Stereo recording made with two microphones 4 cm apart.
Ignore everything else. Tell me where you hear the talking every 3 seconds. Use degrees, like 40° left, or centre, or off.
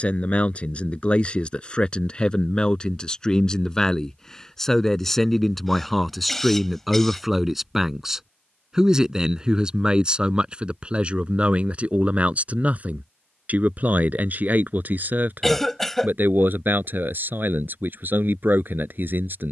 20° left, 10° left, 10° right, 20° right, 40° right, 50° right, 50° right.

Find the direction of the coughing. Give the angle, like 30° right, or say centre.
10° left.